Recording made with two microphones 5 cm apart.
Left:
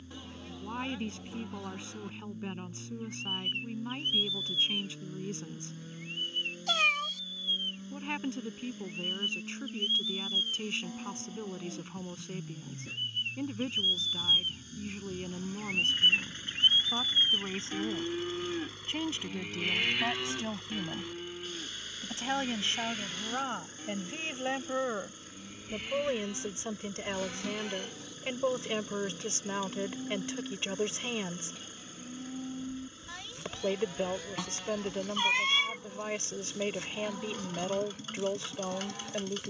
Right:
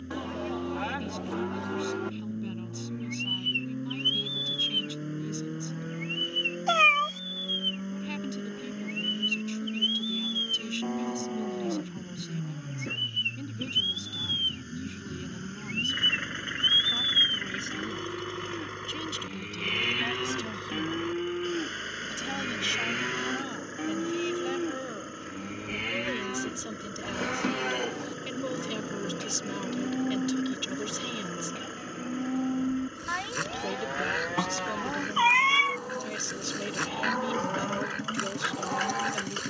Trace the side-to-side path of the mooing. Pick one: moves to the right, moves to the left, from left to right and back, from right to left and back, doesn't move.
from right to left and back.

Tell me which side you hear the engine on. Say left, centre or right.
right.